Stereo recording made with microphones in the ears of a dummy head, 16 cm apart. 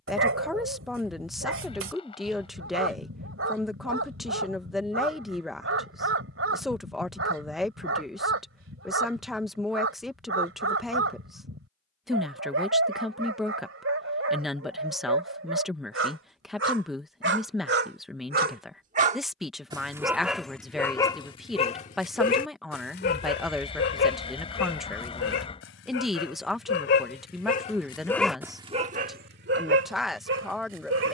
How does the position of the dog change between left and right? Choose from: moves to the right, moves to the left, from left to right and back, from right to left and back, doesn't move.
from right to left and back.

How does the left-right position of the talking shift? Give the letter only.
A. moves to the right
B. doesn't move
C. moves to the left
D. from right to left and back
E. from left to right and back
B.